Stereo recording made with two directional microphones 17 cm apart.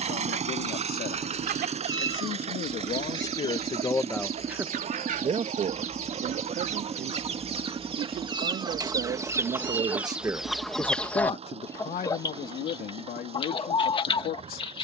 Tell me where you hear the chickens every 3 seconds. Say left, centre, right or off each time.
right, right, right, centre, left.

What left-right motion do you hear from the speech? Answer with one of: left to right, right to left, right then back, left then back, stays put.
right then back.